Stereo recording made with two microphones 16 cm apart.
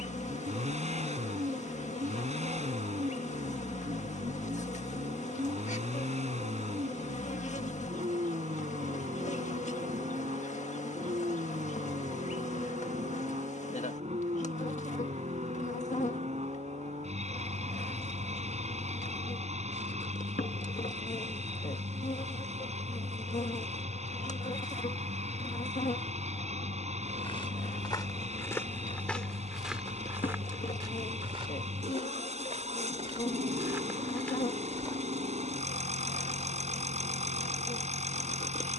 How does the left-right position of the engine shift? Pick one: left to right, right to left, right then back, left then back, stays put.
stays put.